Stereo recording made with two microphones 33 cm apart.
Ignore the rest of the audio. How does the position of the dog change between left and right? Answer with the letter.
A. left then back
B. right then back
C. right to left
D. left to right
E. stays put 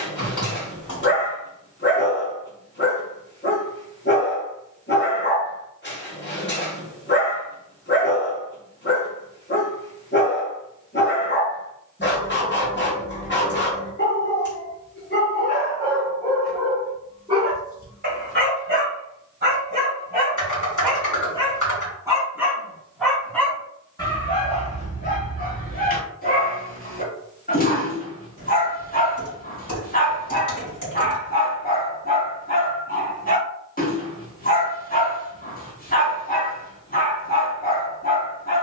B.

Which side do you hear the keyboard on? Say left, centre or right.
left.